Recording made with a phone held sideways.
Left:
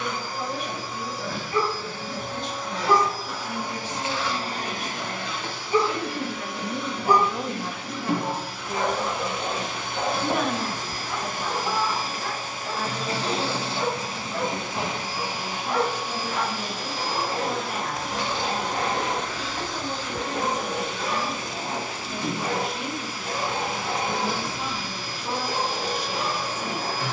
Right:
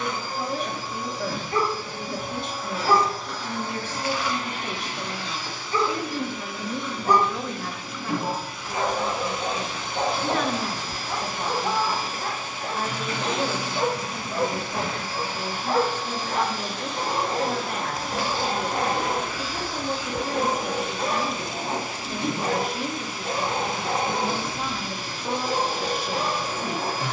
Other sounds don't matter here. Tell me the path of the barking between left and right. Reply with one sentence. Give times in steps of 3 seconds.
In this clip you hear the barking on the right from 0 s, in the centre from 3 s and on the right from 9 s.